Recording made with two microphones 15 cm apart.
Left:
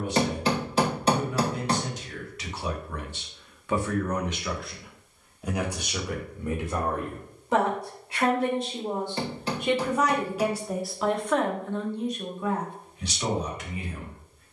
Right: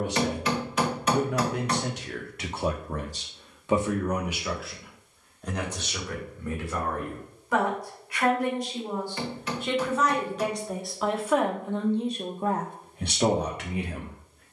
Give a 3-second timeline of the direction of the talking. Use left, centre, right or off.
right, centre, left, centre, right.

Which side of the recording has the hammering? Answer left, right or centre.
left.